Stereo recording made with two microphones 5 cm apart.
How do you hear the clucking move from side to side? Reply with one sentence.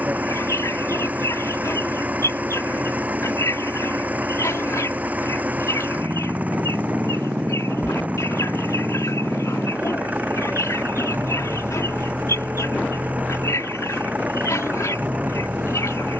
You can hear the clucking stay put.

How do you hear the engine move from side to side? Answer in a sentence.
In this clip you hear the engine stay put.